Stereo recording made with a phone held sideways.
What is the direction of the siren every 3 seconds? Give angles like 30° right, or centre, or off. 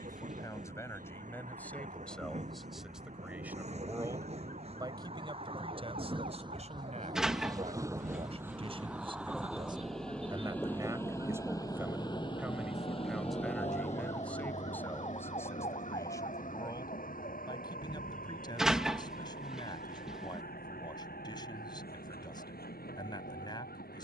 80° right, 70° right, 60° right, 40° right, 10° left, 40° left, 60° left, 70° left.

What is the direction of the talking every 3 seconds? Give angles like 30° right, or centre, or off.
10° left, 20° right, 40° right, 20° right, centre, 20° left, 30° left, 30° left.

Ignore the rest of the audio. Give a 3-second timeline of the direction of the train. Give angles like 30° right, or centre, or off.
50° right, 40° right, 20° right, 10° left, 40° left, 60° left, 70° left, 80° left.